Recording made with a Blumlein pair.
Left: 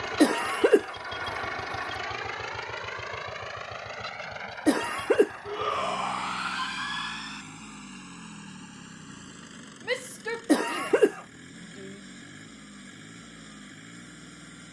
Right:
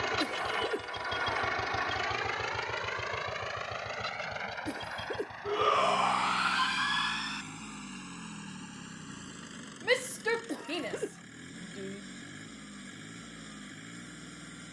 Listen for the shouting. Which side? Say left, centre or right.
centre.